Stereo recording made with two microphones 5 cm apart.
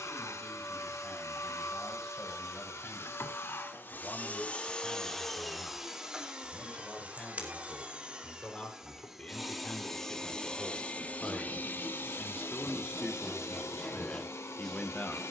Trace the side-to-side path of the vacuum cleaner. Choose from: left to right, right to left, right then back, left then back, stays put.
right then back.